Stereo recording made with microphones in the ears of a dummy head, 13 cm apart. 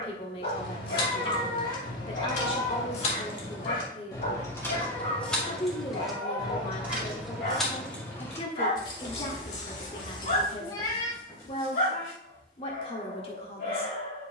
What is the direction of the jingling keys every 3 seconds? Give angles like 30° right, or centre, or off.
60° left, 20° left, centre, 50° left, off.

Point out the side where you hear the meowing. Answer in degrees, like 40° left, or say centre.
30° left.